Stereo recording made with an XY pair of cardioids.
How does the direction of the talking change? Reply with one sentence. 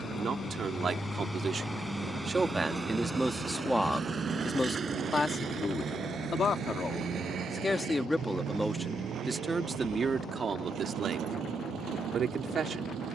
In this clip you hear the talking go left and come back.